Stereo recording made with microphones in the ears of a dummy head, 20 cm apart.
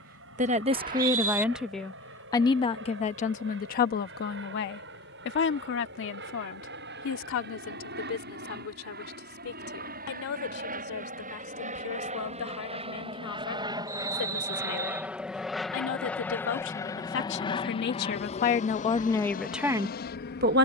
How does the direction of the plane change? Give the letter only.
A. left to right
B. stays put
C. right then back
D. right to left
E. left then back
D.